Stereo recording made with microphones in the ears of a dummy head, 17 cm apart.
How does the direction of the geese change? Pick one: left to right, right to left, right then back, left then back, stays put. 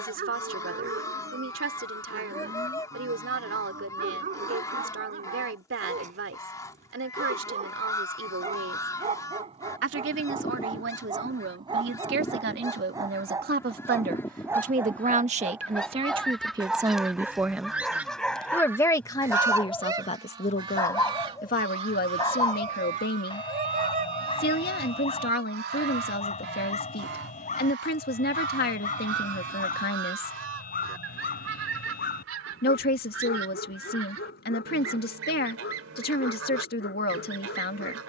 left to right.